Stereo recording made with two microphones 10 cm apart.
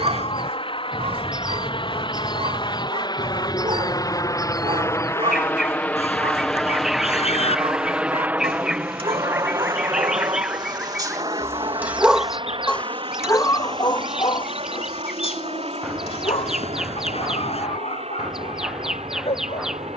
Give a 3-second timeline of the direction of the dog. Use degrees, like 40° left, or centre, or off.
60° right, 60° right, 60° right, 40° right, 30° left, 70° left, 80° left.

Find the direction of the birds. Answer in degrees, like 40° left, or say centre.
centre.